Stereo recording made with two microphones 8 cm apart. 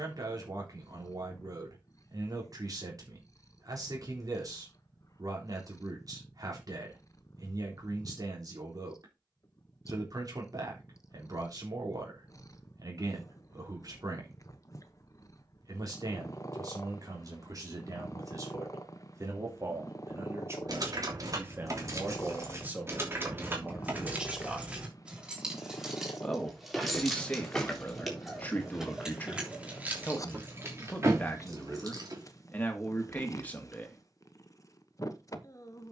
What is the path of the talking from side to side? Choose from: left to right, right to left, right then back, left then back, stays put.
right to left.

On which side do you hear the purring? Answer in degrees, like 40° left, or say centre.
40° left.